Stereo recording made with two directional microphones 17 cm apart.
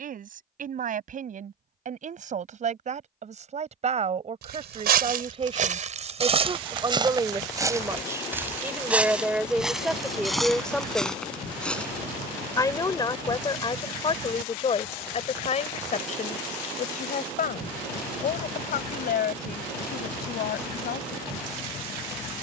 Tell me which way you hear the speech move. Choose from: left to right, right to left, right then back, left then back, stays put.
right to left.